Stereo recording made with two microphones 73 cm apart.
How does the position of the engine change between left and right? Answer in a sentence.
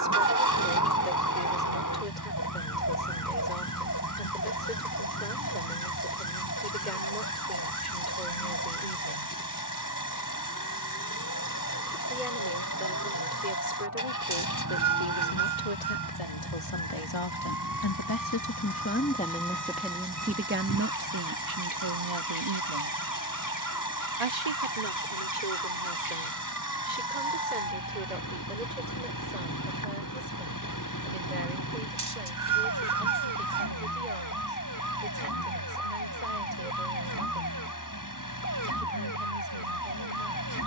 In this clip you hear the engine stay in one place.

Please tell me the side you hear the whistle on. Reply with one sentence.
You can hear the whistle on the right.